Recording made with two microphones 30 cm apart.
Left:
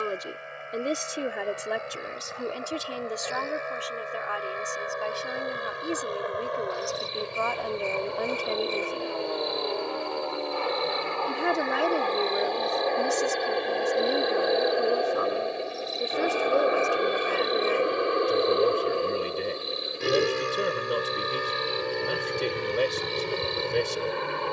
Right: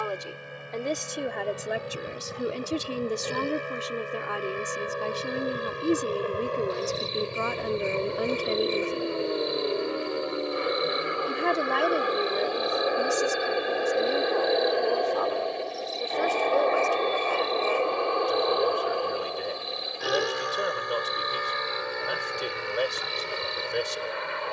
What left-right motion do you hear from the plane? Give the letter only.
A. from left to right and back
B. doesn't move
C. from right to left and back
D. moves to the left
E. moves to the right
D.